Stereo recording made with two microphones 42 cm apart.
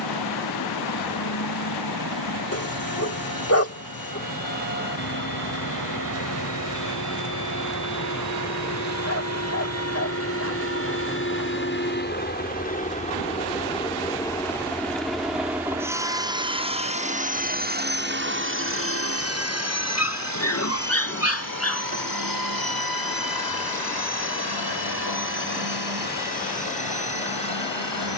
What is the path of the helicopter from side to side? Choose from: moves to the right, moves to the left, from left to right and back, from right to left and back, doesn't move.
moves to the right.